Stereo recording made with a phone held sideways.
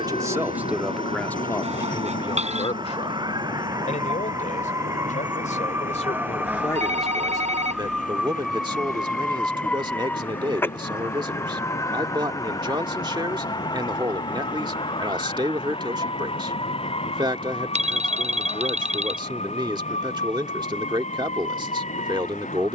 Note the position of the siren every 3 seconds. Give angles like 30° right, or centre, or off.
40° right, 30° right, 10° right, 10° left, 30° left, 40° left, 50° left, 50° left.